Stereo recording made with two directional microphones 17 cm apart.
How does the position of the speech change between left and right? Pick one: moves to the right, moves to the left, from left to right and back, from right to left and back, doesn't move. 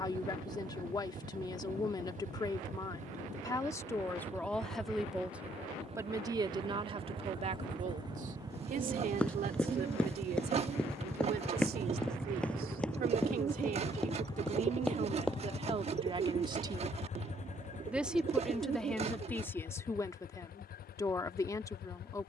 from left to right and back.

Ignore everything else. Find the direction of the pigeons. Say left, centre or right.
right.